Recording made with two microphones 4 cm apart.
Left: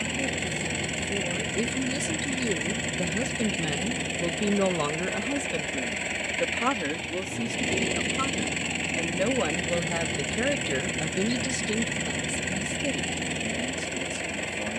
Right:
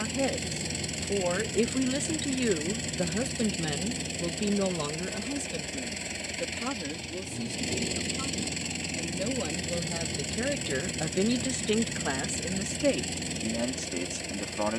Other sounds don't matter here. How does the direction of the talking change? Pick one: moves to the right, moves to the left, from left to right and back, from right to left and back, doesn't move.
from right to left and back.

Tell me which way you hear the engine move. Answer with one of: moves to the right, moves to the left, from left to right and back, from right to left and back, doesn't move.
doesn't move.